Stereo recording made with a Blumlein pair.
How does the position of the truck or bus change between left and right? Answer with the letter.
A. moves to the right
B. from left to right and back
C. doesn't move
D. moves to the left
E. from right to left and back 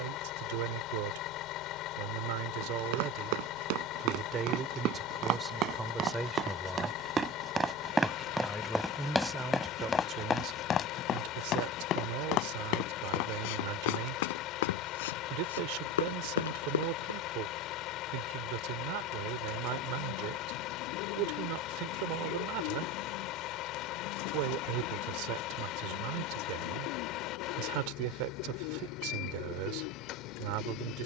C.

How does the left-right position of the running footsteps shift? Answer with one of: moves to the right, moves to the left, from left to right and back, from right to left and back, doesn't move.
moves to the left.